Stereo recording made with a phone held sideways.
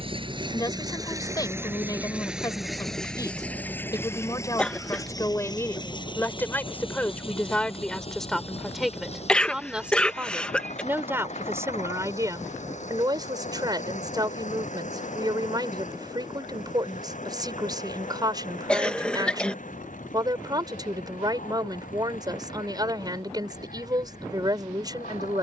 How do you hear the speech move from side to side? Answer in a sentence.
In this clip you hear the speech move from left to right.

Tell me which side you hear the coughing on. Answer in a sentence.
In this clip you hear the coughing in the centre.